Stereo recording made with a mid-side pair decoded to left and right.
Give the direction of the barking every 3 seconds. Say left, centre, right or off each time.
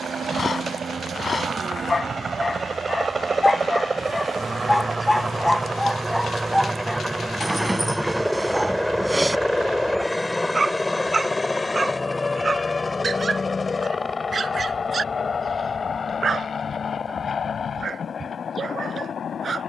left, centre, centre, right, right, right, right.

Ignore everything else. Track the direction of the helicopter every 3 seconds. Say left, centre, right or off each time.
right, right, centre, centre, left, left, left.